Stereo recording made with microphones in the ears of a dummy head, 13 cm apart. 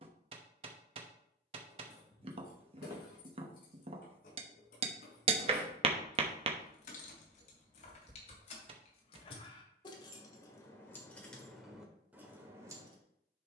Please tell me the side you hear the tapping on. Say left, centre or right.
right.